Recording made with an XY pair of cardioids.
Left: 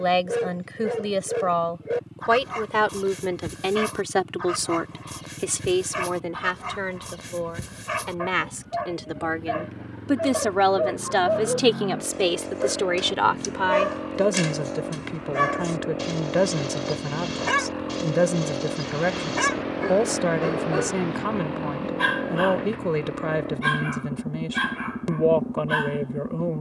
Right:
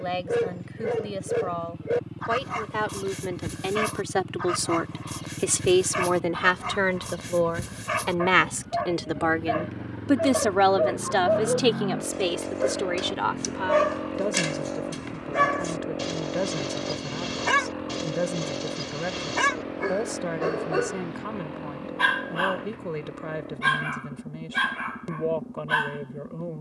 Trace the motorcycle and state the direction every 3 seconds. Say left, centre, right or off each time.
right, right, right, right, centre, centre, left, left, left.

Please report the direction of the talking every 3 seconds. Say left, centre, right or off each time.
left, centre, right, centre, left, left, left, left, left.